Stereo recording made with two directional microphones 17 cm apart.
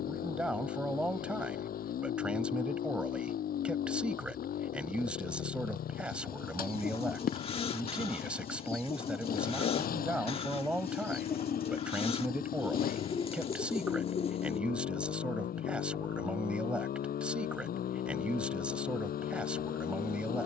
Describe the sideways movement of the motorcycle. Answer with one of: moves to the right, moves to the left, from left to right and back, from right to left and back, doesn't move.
doesn't move.